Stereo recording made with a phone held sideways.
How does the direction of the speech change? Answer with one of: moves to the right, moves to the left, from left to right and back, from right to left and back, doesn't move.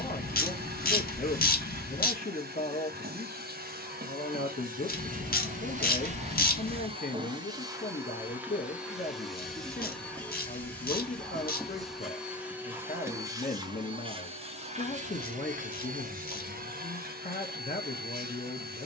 doesn't move.